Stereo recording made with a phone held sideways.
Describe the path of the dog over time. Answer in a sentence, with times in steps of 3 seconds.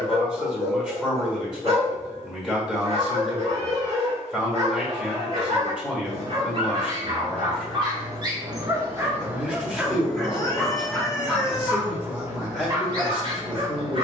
In this clip you hear the dog on the right from 0 s, in the centre from 9 s and on the right from 12 s.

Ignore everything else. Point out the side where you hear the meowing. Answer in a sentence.
You can hear the meowing on the left.